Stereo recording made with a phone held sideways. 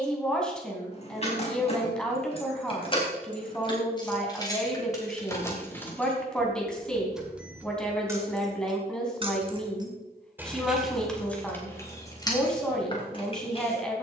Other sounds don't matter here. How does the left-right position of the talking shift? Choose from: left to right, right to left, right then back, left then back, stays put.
stays put.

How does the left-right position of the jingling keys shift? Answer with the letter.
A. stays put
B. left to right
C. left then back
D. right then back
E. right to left
D.